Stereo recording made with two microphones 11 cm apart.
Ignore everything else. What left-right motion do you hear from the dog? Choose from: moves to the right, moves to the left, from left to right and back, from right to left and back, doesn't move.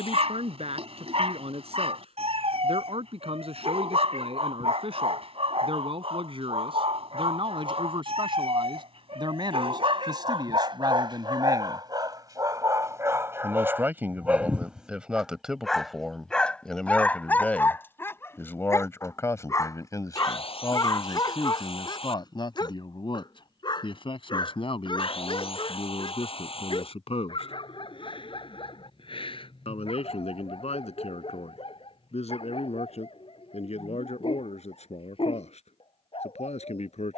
moves to the left.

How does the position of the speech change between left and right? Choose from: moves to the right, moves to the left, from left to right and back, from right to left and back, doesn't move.
moves to the left.